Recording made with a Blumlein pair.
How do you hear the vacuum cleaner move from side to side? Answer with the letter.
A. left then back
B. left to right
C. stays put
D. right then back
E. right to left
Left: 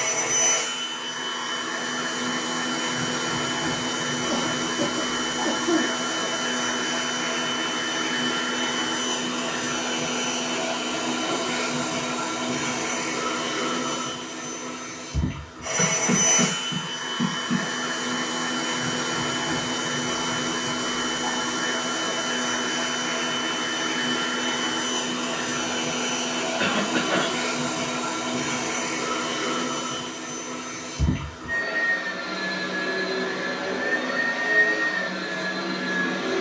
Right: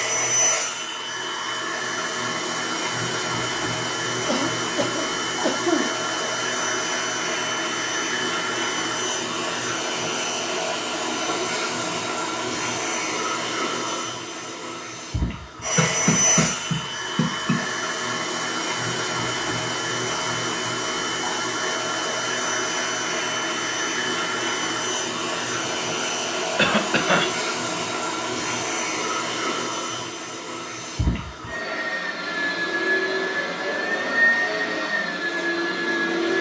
C.